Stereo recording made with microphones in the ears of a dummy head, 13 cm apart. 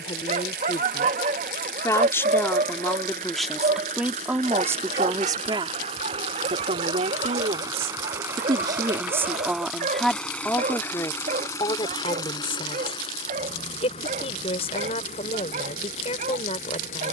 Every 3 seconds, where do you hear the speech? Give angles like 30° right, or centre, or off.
20° left, 10° right, 40° right, 10° left, 40° left, 40° left.